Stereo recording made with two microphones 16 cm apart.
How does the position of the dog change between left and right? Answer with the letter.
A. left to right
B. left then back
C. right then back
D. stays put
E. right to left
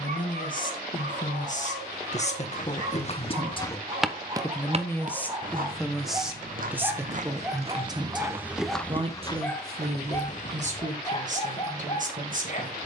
E.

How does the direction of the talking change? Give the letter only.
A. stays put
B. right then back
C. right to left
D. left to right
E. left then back
D.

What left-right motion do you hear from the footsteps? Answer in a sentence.
You can hear the footsteps go right and come back.